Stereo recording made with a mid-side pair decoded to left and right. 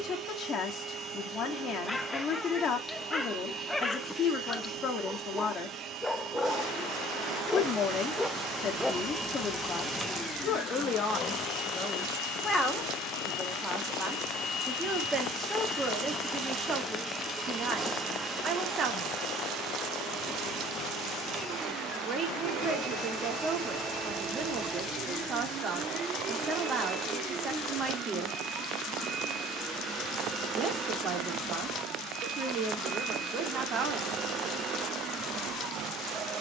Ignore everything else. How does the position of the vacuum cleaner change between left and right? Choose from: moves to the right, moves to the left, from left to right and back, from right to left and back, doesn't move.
from right to left and back.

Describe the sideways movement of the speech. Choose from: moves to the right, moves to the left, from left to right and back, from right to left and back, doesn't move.
moves to the right.